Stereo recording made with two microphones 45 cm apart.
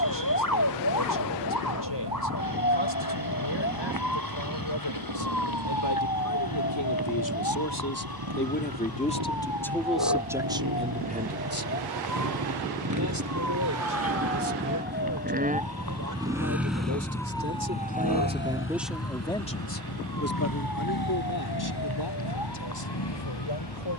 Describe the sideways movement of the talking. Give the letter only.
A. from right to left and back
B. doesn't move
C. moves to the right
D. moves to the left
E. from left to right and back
E.